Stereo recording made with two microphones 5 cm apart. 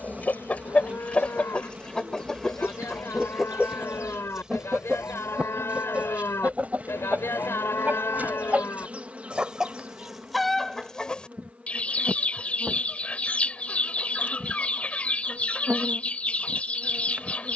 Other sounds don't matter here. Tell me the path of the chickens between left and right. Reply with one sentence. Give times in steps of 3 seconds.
In this clip you hear the chickens on the left from 0 s, in the centre from 3 s, on the right from 6 s, in the centre from 9 s and on the left from 12 s.